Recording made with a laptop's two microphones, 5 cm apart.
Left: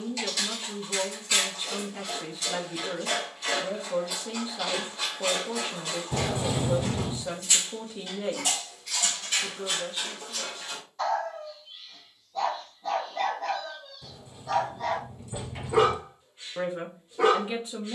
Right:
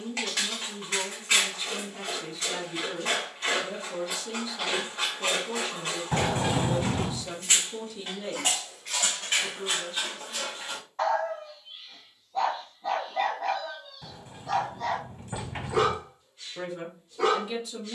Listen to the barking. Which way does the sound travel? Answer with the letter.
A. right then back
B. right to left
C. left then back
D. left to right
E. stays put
B.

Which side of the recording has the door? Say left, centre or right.
right.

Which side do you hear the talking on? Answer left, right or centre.
left.